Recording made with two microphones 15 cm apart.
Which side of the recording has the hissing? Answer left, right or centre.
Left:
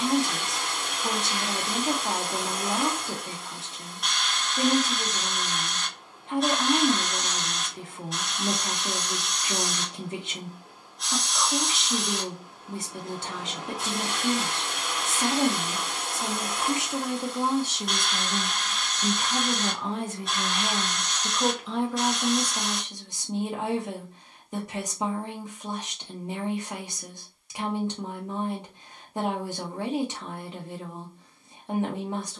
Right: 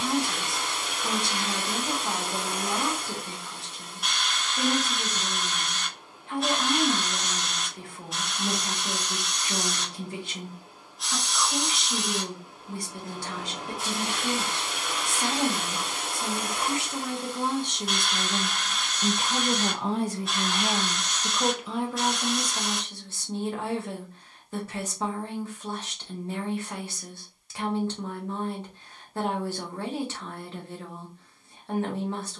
centre.